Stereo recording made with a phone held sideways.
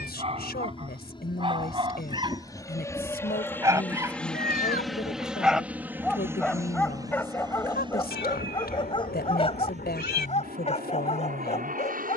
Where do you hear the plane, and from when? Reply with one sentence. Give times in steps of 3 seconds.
In this clip you hear the plane on the left from 0 s, in the centre from 3 s and on the right from 6 s.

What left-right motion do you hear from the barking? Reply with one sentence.
In this clip you hear the barking move to the left.